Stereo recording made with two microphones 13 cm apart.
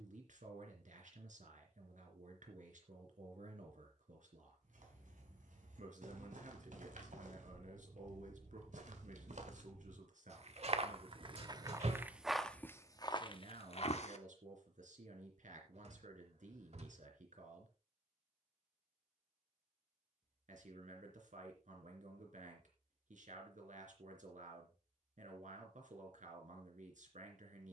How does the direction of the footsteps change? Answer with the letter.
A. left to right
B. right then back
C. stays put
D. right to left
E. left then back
D.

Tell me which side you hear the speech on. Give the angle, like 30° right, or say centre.
70° right.